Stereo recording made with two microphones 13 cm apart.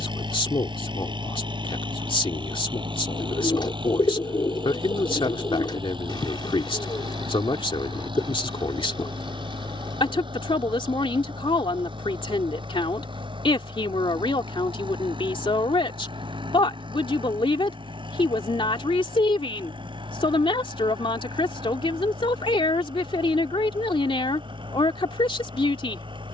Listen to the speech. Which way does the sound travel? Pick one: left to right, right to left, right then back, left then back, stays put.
stays put.